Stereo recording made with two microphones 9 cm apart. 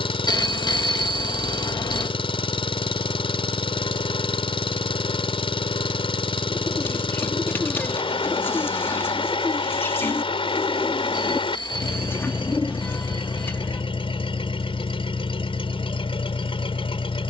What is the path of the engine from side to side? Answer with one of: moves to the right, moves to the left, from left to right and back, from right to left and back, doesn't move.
doesn't move.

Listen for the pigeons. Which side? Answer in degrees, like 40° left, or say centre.
20° left.